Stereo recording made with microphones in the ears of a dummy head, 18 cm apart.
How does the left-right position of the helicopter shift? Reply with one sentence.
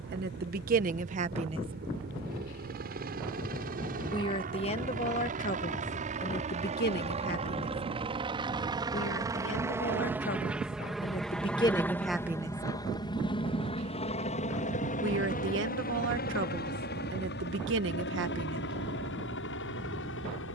You can hear the helicopter travel towards the left.